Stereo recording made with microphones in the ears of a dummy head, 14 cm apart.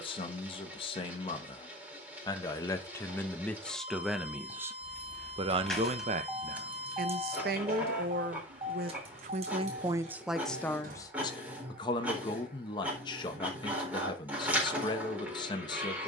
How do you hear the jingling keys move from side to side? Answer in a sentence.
In this clip you hear the jingling keys move from left to right.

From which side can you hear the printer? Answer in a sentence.
In this clip you hear the printer in the centre.